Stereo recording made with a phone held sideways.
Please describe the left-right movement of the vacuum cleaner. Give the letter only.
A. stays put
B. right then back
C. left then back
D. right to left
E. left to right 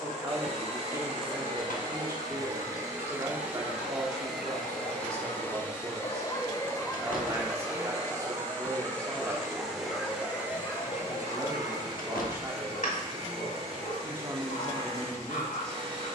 C.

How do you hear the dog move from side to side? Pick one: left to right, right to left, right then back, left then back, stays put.
right then back.